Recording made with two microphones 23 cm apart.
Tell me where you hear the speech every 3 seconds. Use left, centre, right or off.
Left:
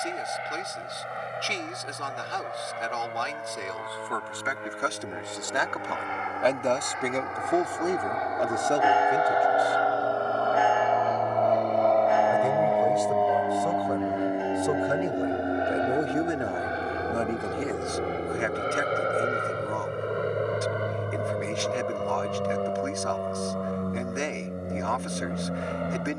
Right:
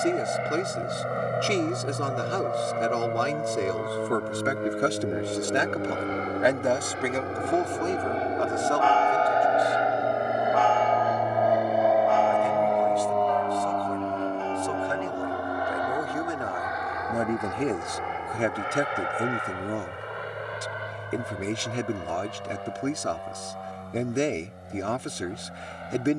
right, right, centre, left, left, centre, right, right, right.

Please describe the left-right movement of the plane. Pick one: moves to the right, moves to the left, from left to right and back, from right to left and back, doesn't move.
moves to the left.